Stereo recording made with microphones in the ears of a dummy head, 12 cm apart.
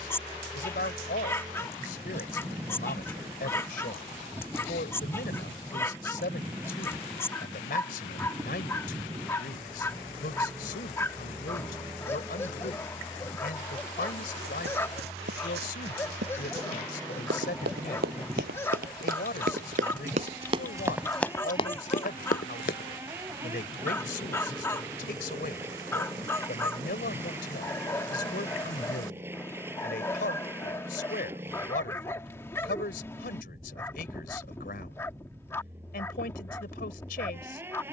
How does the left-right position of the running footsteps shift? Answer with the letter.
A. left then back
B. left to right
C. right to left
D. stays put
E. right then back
C.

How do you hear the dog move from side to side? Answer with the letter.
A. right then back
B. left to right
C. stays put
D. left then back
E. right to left
C.